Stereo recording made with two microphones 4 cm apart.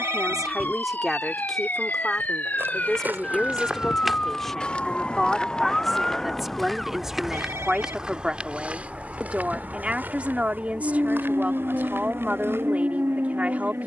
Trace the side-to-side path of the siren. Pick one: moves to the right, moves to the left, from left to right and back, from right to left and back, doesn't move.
moves to the right.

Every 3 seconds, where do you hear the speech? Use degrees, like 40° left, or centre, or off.
centre, 10° left, 10° right, 30° right, 30° right.